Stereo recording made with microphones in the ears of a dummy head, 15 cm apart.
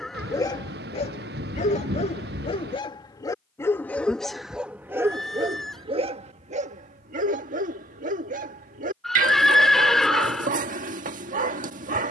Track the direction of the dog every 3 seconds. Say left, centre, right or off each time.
left, centre, right, right.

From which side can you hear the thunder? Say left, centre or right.
right.